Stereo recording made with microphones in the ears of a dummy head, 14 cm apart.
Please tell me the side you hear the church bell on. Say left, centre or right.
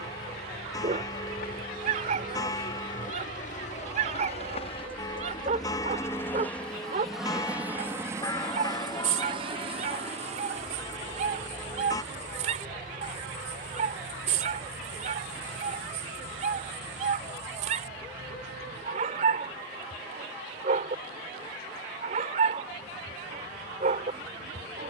left.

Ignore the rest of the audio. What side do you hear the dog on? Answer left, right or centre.
right.